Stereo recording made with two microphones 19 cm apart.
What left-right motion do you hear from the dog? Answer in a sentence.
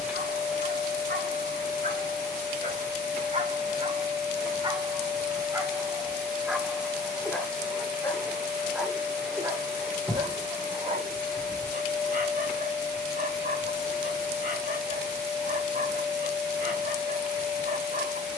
You can hear the dog move from right to left and back again.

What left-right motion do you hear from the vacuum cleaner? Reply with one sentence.
You can hear the vacuum cleaner stay put.